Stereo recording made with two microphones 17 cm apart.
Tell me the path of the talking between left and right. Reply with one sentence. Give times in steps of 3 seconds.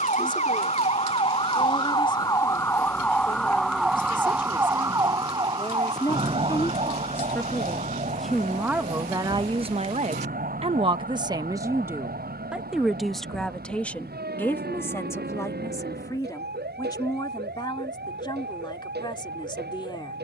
You can hear the talking on the left from 0 s, in the centre from 6 s, on the right from 9 s, in the centre from 12 s and on the left from 15 s.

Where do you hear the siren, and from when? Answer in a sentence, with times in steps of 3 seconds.
You can hear the siren on the left from 0 s, in the centre from 3 s and on the right from 6 s.